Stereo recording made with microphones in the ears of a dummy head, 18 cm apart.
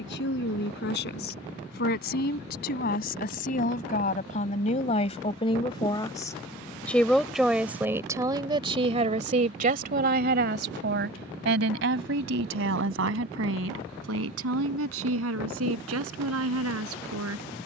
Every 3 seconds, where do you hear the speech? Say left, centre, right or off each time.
left, left, centre, right, right, right.